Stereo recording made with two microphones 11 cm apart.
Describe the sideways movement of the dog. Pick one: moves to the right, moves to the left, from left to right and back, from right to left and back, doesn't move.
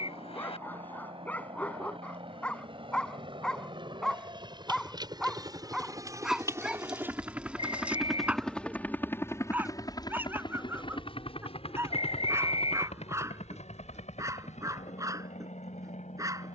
moves to the right.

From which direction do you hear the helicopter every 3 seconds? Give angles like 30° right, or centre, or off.
60° right, 40° right, 10° right, 40° left, 70° left, 80° left.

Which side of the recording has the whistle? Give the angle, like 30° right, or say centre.
60° left.